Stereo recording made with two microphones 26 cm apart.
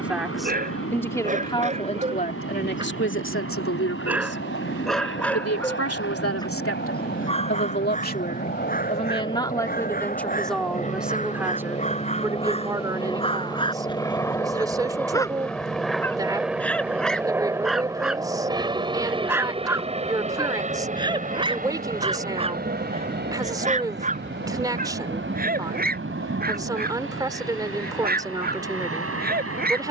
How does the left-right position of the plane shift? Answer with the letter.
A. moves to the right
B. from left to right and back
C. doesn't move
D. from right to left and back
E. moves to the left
A.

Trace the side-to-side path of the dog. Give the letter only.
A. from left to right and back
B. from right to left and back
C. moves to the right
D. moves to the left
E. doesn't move
B.